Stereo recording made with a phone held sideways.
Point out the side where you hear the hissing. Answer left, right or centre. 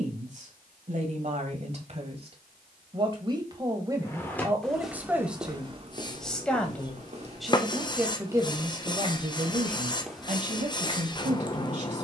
left.